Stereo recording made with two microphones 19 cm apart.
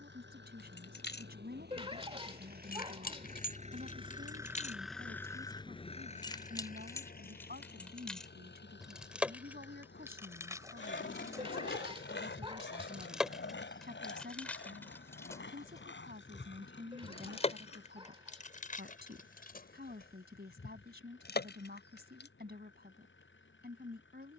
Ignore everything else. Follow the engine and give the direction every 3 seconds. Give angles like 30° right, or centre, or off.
60° right, 10° right, 50° left, 70° left, 80° left, 80° left, 80° left, 80° left.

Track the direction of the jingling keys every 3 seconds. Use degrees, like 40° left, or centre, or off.
60° left, 50° left, 10° left, 10° right, centre, 30° left, 50° left, 60° left.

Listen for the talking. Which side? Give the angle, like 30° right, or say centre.
60° right.